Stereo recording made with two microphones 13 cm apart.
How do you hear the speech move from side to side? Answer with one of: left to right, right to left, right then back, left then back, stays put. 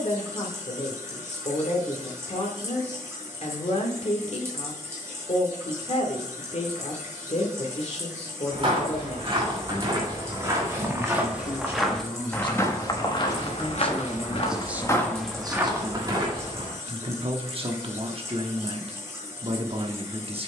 left to right.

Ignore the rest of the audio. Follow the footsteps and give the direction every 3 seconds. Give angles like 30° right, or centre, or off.
off, off, 40° right, 20° right, 40° left, 20° right, off.